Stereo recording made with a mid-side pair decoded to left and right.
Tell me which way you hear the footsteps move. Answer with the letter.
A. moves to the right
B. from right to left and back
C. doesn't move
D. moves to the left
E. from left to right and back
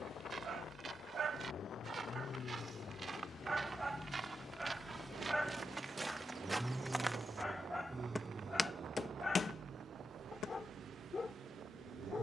D.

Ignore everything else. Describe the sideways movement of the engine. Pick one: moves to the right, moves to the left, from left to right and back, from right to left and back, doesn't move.
moves to the right.